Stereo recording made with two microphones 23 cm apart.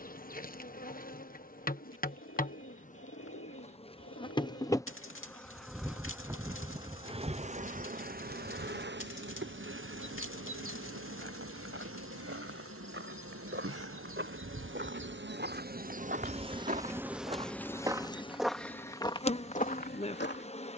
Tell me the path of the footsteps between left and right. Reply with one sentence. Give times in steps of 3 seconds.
You can hear the footsteps not at all from 0 s, on the right from 9 s and on the left from 18 s.